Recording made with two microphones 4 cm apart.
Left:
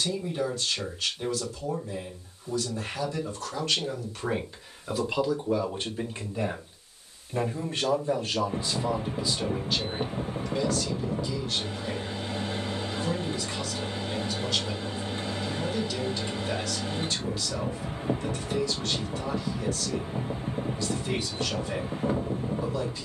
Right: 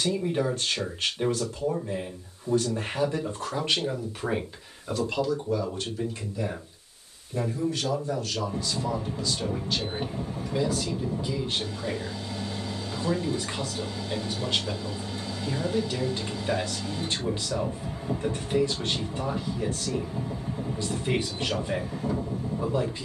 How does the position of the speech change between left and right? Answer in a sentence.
You can hear the speech go left and come back.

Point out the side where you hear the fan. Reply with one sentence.
You can hear the fan on the left.